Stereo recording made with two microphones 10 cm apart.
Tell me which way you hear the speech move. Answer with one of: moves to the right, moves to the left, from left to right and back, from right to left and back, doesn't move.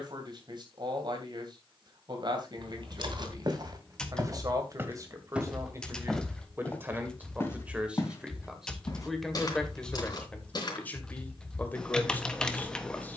moves to the left.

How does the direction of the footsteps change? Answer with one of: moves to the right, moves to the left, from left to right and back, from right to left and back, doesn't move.
moves to the left.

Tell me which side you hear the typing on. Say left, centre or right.
centre.